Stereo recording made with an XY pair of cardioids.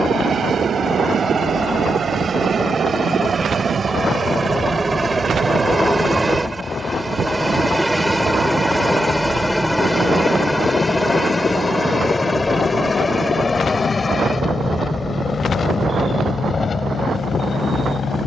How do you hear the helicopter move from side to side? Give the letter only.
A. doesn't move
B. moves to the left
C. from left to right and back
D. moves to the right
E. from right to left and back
B.